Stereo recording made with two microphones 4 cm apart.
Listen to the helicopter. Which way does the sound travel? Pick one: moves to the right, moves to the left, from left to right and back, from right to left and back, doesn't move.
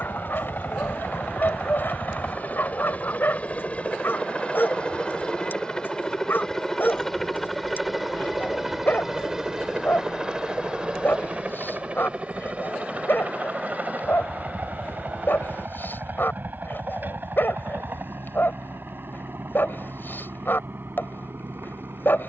moves to the right.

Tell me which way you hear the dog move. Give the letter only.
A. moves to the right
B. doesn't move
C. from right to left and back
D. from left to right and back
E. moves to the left
B.